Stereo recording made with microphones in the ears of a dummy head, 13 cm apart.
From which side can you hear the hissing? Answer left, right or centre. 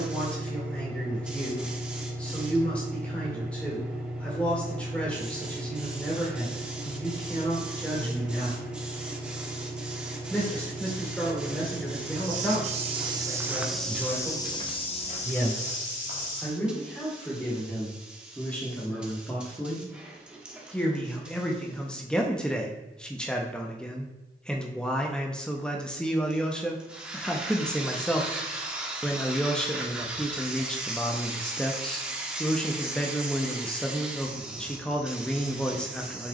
centre.